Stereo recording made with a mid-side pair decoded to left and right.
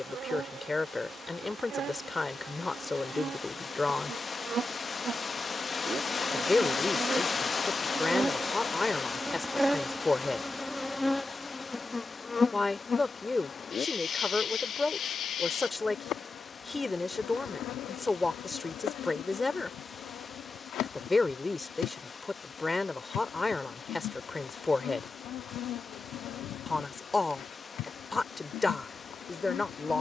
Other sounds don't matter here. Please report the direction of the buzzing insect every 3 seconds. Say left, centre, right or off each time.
right, right, right, centre, left, left, left, left, left, left.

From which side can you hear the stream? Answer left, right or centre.
left.